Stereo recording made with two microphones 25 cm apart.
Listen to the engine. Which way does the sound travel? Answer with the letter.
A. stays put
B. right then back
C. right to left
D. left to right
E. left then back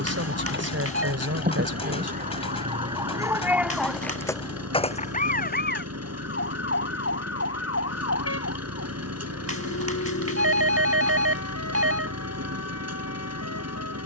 A.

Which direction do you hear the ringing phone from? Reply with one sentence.
You can hear the ringing phone on the right.